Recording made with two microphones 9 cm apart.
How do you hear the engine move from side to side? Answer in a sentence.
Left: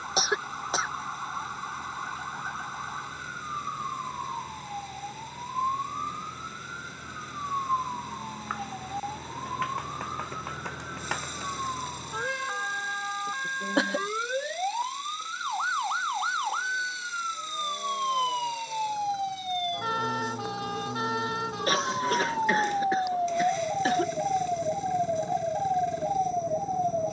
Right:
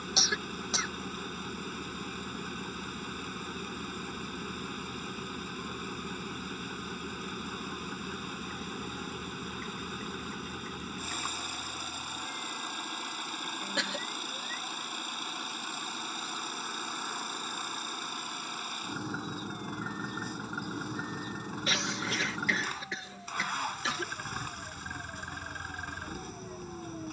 In this clip you hear the engine stay put.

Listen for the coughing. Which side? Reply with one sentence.
You can hear the coughing on the left.